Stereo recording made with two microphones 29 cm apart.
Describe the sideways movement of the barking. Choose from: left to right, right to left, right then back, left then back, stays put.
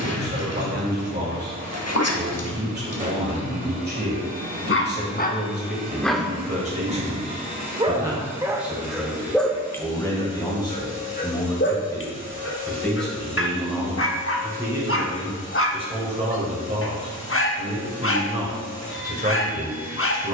right then back.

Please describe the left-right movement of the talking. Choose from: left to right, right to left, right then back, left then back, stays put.
left then back.